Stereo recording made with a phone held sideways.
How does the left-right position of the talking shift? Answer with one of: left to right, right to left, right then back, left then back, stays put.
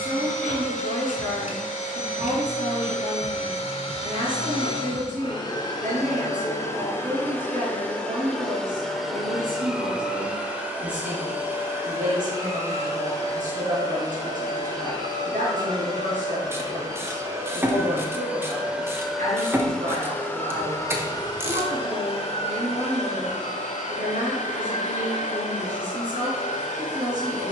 stays put.